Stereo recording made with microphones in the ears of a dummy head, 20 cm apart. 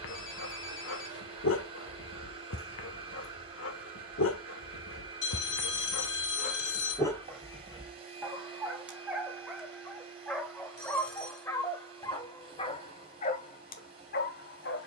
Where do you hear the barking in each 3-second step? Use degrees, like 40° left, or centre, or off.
60° left, 60° left, 10° left, centre, 40° left.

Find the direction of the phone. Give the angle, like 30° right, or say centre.
70° left.